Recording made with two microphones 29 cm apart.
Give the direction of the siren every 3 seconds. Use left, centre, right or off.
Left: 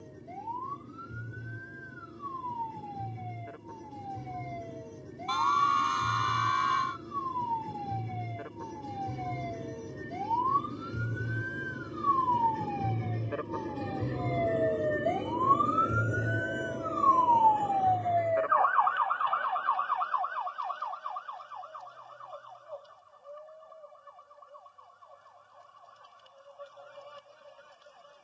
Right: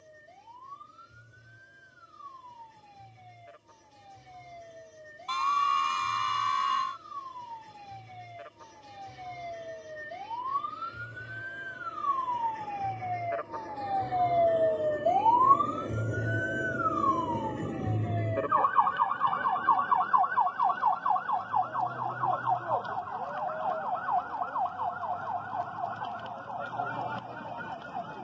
left, left, left, left, left, centre, right, right, right, right.